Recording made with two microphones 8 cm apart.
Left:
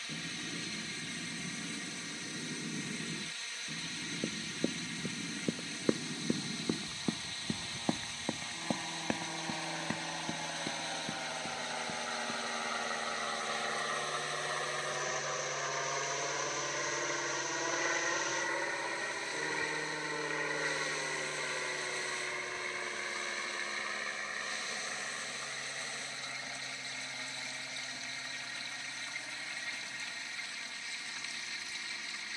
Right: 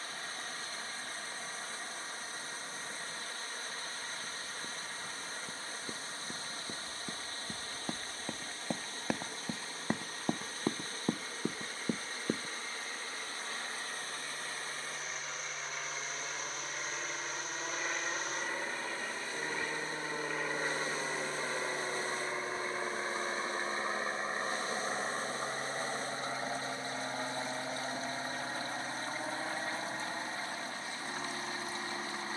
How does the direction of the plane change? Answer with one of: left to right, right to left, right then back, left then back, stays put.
left to right.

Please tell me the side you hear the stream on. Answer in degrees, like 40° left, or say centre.
40° right.